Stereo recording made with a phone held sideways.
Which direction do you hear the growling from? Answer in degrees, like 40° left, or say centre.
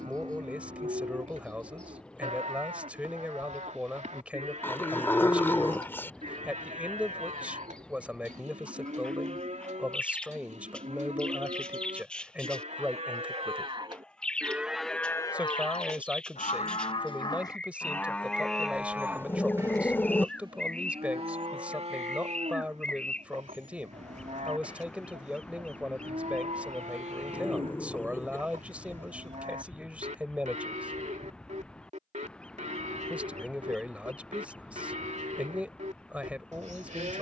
10° left.